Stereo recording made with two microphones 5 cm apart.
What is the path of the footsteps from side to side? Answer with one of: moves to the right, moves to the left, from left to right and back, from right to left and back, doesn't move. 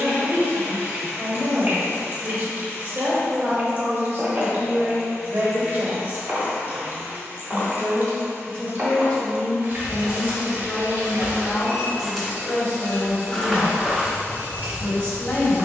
from right to left and back.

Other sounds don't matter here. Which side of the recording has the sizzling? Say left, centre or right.
right.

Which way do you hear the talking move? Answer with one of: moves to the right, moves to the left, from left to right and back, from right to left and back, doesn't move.
moves to the left.